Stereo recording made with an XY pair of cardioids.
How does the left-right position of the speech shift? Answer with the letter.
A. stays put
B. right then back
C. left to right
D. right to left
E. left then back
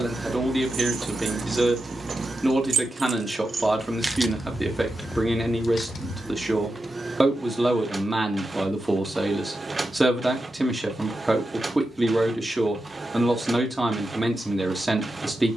A.